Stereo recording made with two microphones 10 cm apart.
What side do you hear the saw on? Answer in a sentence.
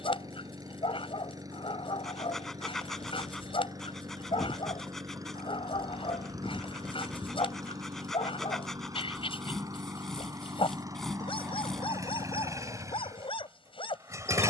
You can hear the saw in the centre.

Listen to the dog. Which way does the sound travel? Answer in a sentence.
In this clip you hear the dog stay in one place.